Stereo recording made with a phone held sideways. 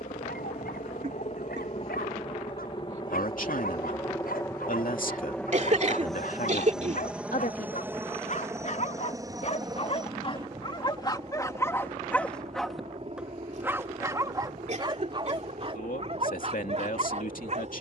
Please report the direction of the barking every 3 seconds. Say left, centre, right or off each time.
left, left, left, left, centre, right.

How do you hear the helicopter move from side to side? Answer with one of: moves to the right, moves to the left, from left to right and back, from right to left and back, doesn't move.
moves to the right.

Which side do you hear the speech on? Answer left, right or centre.
left.